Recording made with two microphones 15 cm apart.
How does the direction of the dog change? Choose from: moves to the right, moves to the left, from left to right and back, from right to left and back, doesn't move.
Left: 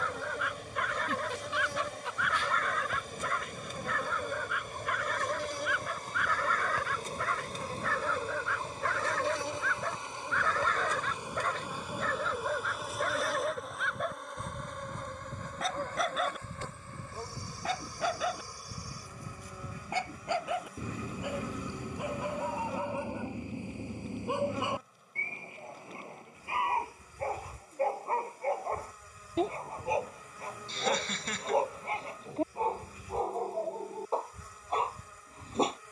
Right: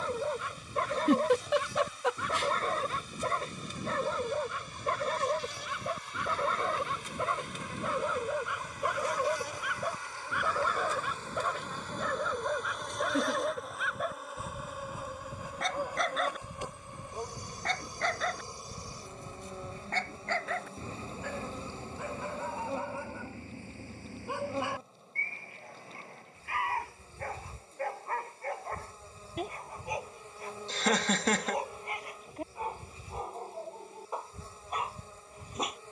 moves to the left.